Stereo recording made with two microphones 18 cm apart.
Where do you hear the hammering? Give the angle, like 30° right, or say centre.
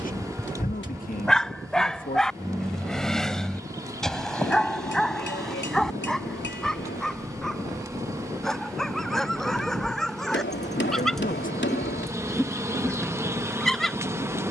80° left.